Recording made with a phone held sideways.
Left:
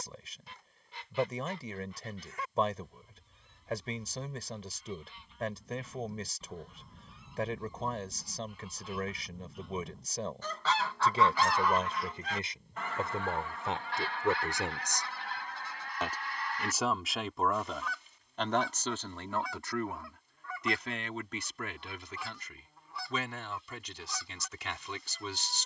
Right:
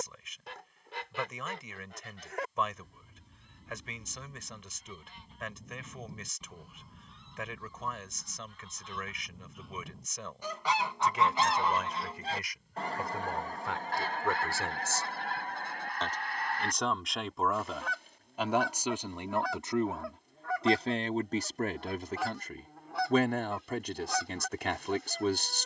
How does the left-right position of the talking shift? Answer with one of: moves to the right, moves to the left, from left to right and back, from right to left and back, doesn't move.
moves to the right.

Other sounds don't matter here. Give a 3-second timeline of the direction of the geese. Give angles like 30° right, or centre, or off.
70° right, 50° right, centre, 10° right, 40° right, 60° right, 70° right, 70° right, 70° right.